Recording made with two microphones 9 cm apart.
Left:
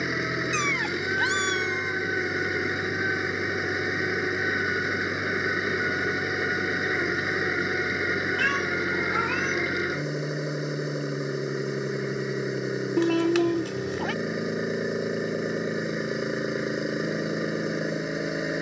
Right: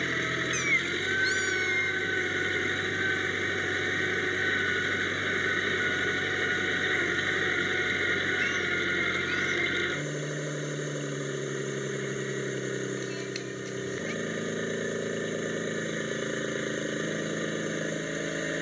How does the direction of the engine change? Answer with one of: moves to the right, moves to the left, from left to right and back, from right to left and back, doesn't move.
doesn't move.